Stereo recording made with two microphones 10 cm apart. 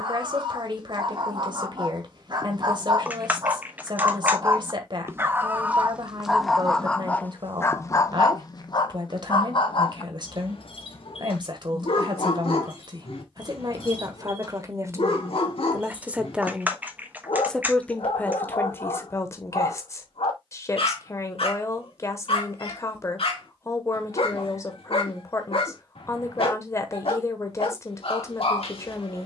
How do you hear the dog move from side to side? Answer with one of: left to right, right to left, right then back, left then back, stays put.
right to left.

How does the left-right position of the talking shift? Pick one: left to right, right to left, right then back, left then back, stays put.
right to left.